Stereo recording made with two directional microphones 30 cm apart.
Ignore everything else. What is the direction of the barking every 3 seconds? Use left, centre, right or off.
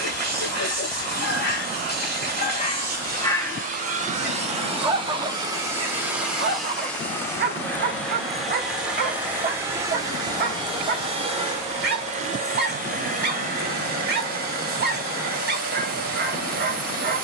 left, centre, right, right, right, right.